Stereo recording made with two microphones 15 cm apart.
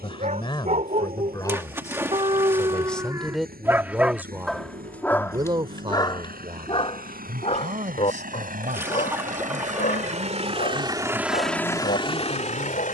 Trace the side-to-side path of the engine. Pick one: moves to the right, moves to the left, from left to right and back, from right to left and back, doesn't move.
moves to the left.